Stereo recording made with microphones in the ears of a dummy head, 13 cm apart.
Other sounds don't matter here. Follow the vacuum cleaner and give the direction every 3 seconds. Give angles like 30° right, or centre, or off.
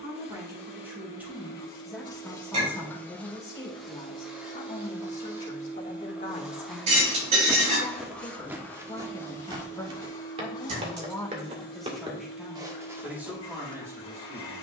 30° left, 10° right, centre, 30° left, 40° left.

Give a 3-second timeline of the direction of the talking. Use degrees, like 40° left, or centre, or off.
10° right, 40° left, 40° left, 10° left, 10° right.